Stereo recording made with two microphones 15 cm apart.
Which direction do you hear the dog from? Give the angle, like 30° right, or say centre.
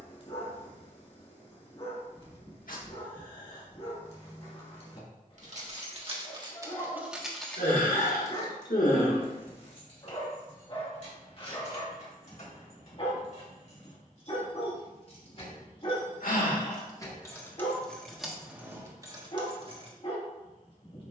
40° left.